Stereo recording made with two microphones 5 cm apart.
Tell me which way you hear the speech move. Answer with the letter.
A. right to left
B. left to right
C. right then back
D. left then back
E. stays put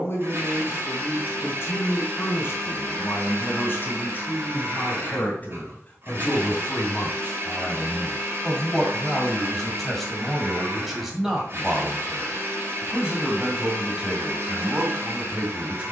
B.